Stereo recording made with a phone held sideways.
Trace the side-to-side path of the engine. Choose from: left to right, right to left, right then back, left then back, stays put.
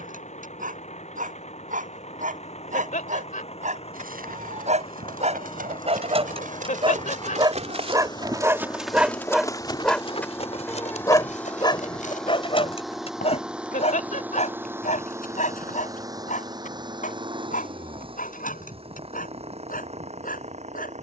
left to right.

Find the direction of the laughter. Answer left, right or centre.
left.